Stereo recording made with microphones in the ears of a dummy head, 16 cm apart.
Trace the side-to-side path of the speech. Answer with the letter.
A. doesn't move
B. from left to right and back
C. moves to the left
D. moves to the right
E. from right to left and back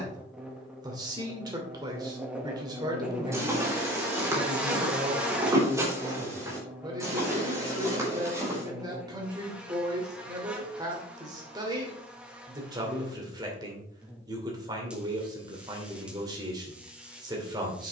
A.